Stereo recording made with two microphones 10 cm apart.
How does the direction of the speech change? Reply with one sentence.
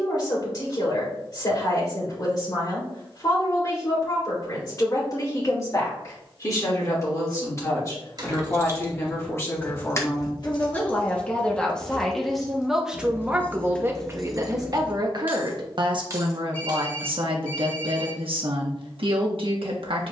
You can hear the speech go from the left side to the right.